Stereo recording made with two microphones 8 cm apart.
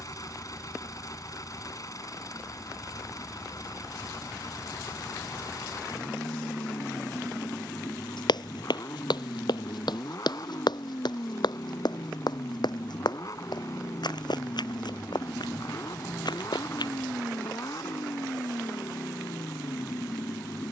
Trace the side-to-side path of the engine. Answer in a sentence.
In this clip you hear the engine stay put.